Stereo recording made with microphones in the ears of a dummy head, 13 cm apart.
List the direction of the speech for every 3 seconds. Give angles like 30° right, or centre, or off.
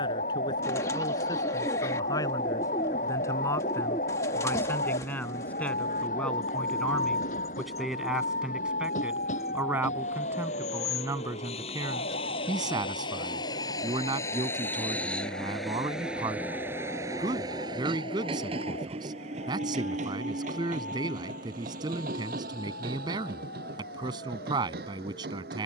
30° left, 20° left, centre, 20° right, 30° right, 30° right, 30° right, 30° right, 30° right.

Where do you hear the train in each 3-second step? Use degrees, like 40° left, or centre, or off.
70° left, 70° left, 60° left, 50° left, 30° left, 10° right, 50° right, 70° right, 70° right.